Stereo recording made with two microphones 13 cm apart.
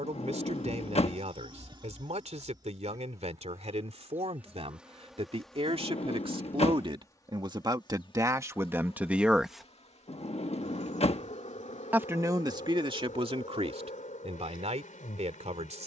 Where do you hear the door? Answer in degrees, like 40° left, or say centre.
50° left.